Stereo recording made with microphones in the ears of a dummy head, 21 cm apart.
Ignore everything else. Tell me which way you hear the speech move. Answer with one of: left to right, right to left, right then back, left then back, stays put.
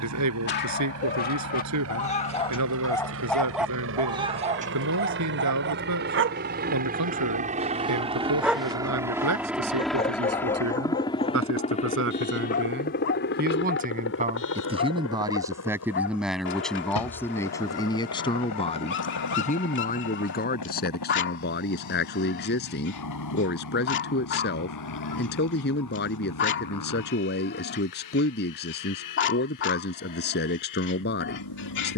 right to left.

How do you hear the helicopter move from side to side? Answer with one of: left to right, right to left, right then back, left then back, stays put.
right to left.